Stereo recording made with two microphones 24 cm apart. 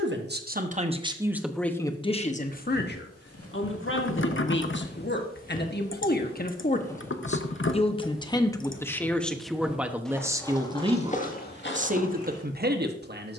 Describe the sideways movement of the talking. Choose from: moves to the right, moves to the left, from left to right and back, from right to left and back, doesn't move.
from right to left and back.